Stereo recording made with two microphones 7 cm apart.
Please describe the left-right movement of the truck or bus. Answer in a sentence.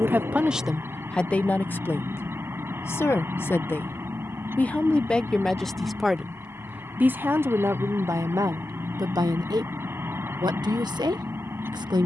In this clip you hear the truck or bus stay put.